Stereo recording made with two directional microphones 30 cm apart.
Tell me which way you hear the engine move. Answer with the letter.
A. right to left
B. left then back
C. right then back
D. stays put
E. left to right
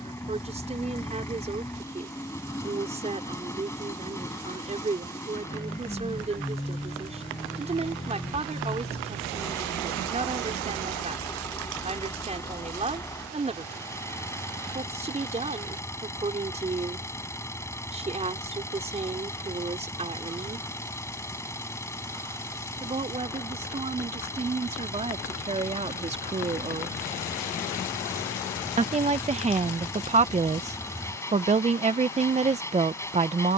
D.